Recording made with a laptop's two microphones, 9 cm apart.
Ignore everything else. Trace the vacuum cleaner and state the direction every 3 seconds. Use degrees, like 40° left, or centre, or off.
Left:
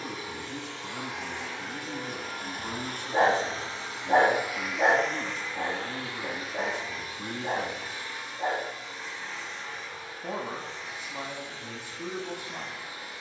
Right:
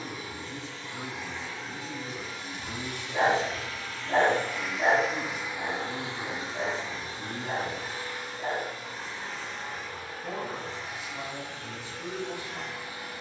60° left, 10° left, 30° right, 50° right, 50° right.